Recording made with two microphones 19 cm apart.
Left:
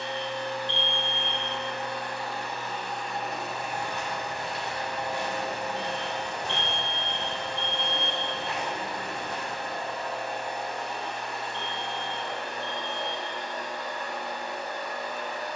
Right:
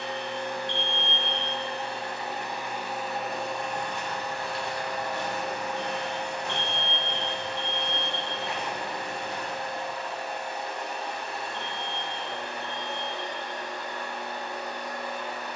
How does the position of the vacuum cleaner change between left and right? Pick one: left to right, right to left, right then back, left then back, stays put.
right to left.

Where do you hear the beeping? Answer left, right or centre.
left.